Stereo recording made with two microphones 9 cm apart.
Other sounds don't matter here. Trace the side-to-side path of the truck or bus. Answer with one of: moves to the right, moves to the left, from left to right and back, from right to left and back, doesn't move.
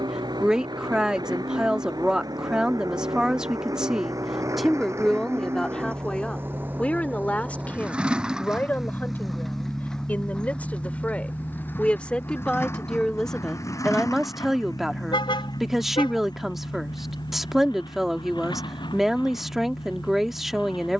moves to the left.